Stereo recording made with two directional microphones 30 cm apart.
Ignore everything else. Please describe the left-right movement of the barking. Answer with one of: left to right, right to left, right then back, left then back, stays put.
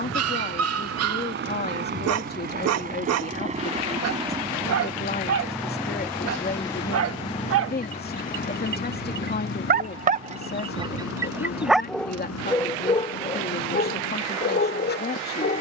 right to left.